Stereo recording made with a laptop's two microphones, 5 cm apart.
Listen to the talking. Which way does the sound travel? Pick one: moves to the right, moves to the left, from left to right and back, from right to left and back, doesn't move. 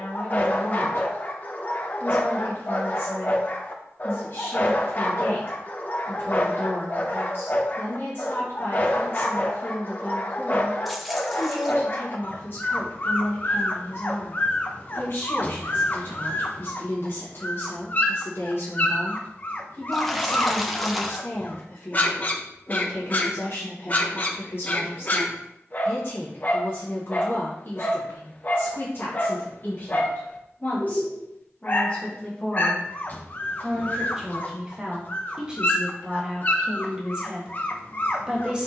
moves to the right.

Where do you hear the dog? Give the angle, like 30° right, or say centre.
30° left.